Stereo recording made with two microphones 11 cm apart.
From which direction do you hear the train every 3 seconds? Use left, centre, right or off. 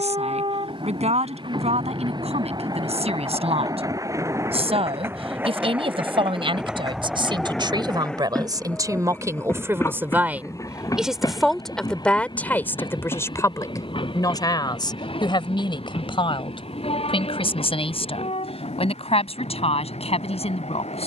right, right, centre, left, left, left, left.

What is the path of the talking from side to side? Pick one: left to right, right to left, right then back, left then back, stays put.
right to left.